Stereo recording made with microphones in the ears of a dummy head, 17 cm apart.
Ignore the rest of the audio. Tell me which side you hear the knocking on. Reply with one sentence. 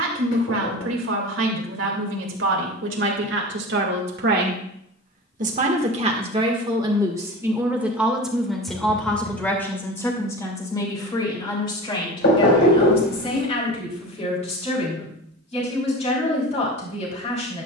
You can hear the knocking on the left.